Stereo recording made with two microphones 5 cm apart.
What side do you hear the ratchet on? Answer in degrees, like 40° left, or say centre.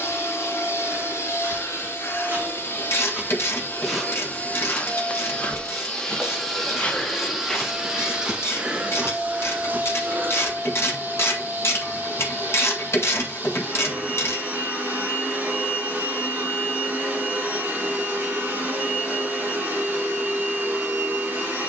70° left.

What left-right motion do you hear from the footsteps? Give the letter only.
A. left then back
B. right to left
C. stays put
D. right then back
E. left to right
A.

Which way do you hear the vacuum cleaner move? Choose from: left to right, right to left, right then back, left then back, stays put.
left to right.